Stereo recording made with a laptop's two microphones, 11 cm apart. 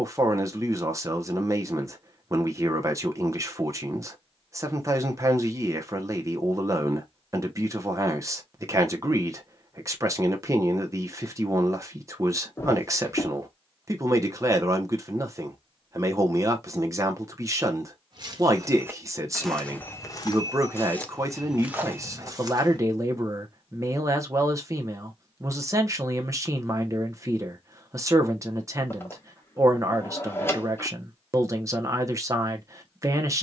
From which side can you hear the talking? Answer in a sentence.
In this clip you hear the talking on the right.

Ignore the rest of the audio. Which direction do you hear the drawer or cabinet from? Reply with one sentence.
In this clip you hear the drawer or cabinet on the left.